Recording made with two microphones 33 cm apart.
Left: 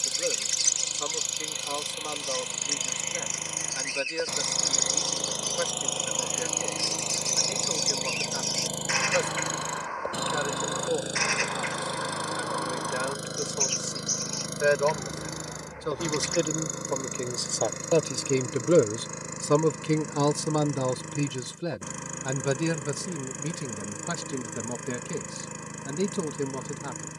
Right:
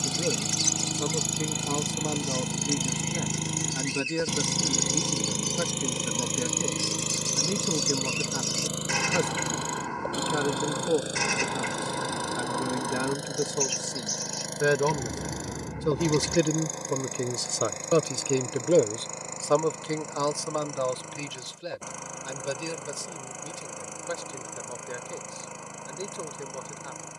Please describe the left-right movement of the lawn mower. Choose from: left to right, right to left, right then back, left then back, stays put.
right to left.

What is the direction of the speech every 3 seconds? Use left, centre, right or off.
right, right, right, right, right, right, left, left, left.